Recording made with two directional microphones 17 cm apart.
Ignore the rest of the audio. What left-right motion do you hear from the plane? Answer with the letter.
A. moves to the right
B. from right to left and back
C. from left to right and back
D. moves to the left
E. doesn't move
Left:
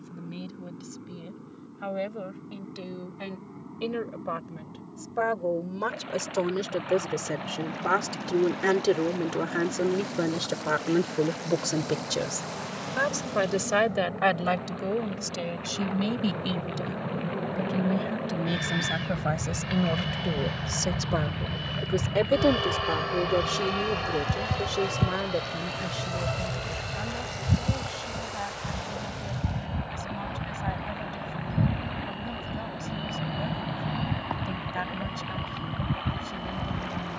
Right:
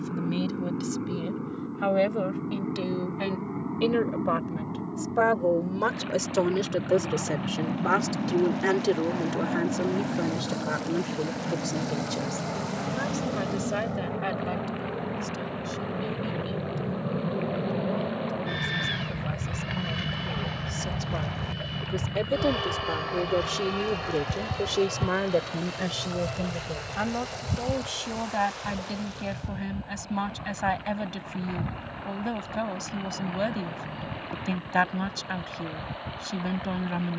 D.